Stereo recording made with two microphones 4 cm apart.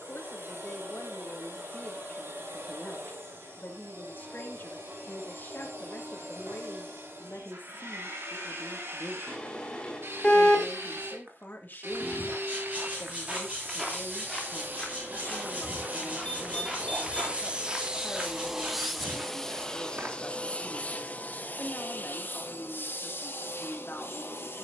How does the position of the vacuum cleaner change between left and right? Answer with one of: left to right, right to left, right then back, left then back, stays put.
right to left.